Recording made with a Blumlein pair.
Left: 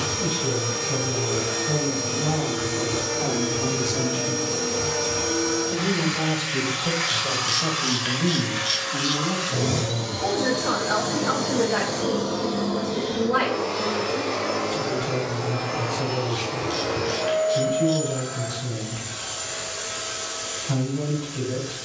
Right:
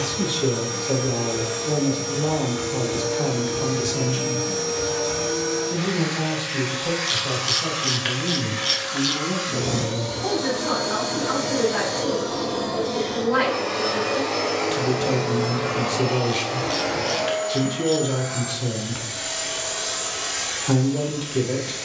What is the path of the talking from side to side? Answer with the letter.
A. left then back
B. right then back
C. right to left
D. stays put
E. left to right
A.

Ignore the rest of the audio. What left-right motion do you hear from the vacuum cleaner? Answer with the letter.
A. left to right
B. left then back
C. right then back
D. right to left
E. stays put
A.